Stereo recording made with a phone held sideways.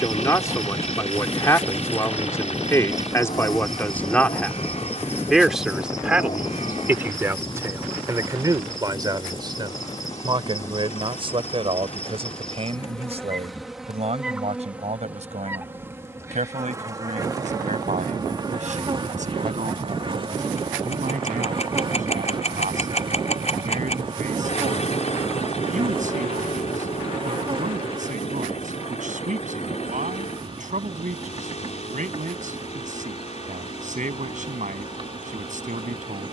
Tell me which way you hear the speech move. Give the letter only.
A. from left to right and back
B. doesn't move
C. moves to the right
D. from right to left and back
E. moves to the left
C.